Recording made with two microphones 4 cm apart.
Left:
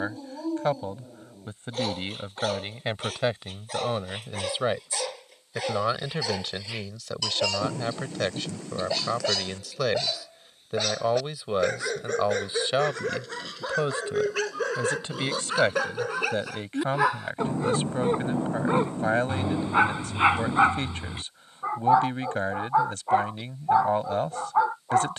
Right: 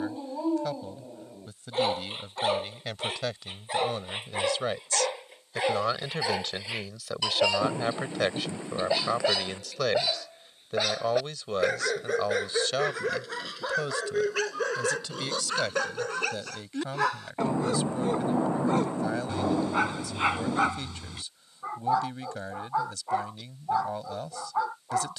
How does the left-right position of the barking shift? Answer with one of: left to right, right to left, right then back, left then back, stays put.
right to left.